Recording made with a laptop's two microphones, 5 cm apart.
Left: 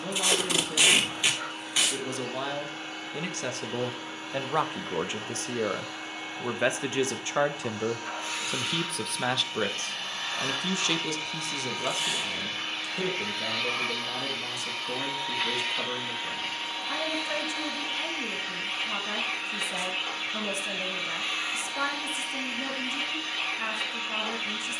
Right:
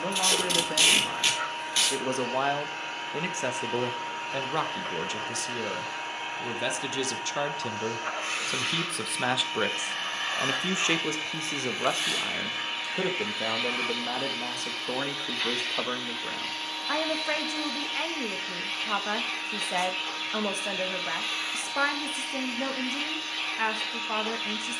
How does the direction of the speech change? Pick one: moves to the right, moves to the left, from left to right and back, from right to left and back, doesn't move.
from right to left and back.